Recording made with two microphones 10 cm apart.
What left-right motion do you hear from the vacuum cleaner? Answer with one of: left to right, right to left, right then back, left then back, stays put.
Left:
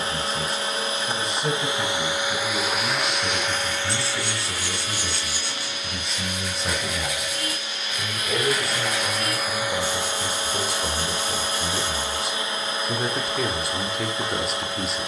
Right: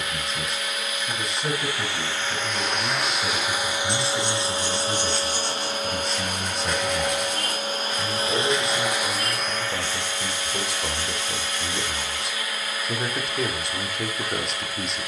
right then back.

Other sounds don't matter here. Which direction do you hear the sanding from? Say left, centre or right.
centre.